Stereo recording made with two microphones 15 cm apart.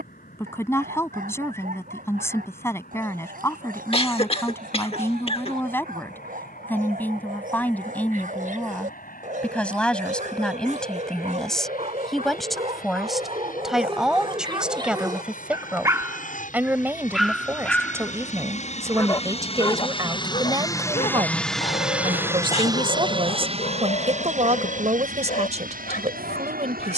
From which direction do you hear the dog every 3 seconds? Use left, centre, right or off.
right, right, right, right, right, centre, left, left, left.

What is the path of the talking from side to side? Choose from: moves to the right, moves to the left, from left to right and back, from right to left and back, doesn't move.
moves to the right.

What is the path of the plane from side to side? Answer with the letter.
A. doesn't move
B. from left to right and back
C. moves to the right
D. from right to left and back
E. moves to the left
C.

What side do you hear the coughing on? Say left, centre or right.
left.